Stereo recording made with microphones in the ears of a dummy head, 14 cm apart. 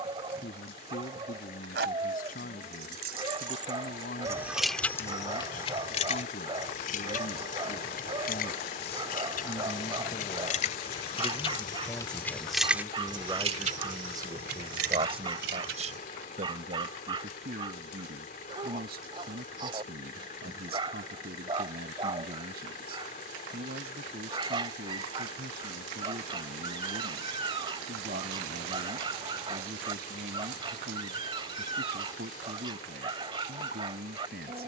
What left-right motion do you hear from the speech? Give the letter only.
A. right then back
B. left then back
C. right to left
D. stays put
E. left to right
E.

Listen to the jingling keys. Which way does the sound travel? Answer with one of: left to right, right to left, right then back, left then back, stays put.
left then back.